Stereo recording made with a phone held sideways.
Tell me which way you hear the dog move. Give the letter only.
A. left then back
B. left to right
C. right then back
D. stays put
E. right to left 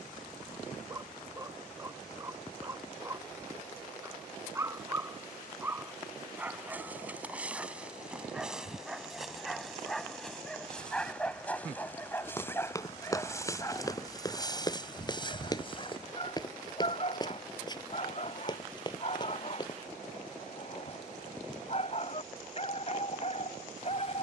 E.